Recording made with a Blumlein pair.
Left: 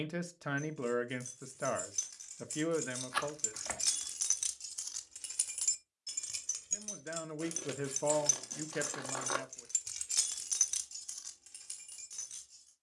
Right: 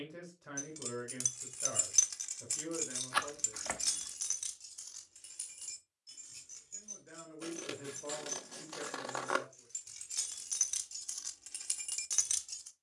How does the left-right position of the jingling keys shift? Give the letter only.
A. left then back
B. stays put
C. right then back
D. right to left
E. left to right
A.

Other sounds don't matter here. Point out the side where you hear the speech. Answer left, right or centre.
left.